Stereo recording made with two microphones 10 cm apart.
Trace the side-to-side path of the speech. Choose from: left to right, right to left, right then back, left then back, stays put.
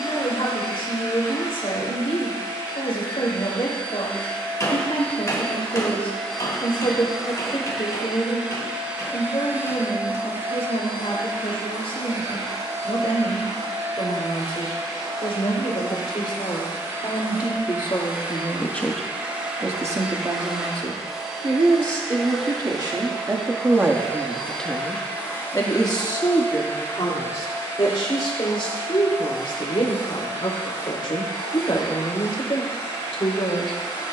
right then back.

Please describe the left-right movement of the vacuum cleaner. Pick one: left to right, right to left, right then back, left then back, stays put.
right then back.